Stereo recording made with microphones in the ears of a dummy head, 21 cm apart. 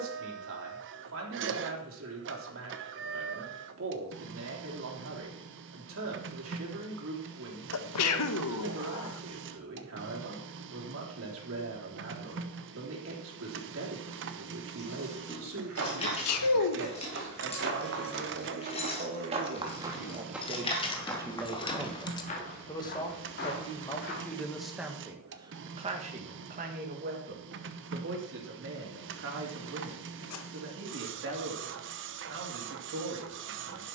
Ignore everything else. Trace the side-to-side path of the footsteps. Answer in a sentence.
You can hear the footsteps move from right to left.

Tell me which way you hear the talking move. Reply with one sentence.
In this clip you hear the talking move from right to left and back again.